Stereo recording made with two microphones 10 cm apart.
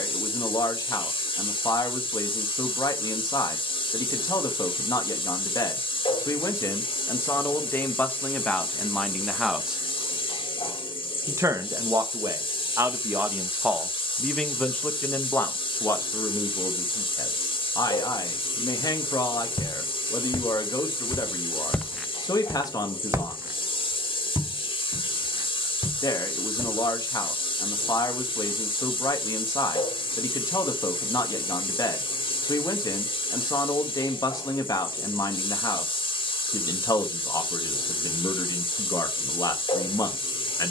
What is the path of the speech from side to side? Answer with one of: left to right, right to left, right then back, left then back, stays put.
right then back.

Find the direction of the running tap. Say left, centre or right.
left.